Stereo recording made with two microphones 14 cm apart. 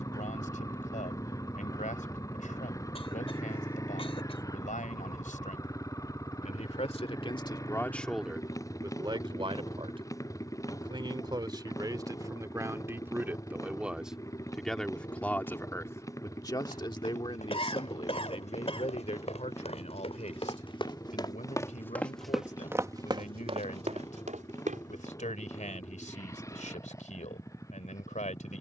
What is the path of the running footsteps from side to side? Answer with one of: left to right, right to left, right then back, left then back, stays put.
left to right.